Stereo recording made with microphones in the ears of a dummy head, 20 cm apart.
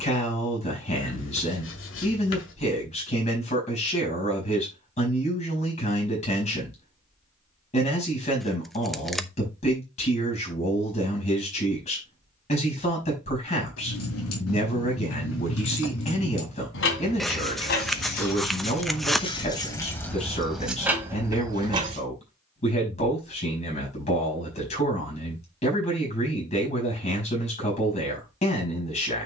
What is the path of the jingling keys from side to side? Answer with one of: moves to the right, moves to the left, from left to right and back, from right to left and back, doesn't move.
moves to the right.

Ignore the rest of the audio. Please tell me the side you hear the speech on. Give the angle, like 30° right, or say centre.
30° left.